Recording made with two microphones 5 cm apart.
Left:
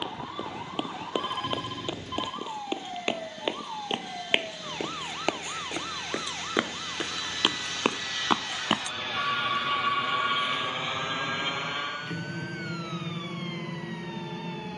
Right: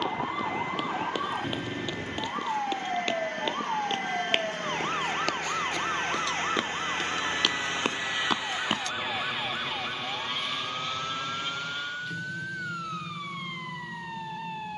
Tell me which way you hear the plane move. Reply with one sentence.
In this clip you hear the plane travel towards the left.